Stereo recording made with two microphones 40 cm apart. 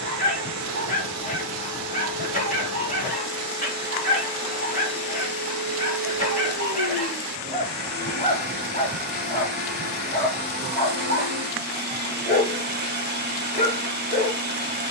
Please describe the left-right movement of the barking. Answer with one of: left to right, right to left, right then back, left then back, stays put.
stays put.